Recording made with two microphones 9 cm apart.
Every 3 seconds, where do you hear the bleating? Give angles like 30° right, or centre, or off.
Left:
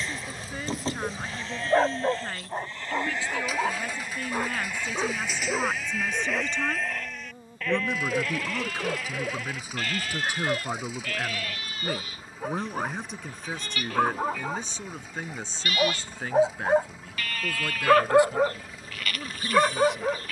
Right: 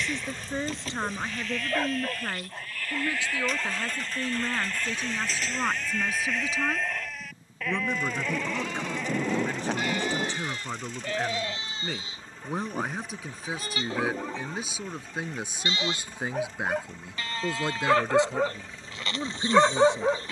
30° left, 10° left, 10° right, 20° right, 30° right, 30° right, 30° right.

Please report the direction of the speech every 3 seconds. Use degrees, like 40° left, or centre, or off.
20° right, 10° right, centre, 10° left, centre, 20° right, 30° right.